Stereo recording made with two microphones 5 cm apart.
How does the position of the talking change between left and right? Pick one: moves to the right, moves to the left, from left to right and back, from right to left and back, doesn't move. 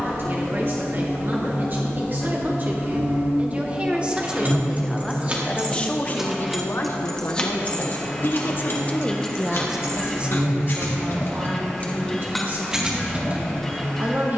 from right to left and back.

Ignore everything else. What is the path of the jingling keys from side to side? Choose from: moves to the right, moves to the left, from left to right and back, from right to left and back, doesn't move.
from right to left and back.